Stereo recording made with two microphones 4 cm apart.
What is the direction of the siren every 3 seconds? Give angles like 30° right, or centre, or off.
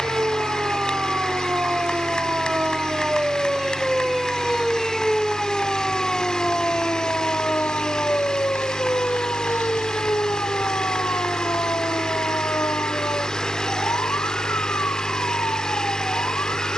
30° right, centre, 40° left, 60° left, 70° left, 80° left.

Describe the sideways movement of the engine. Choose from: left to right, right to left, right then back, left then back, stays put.
stays put.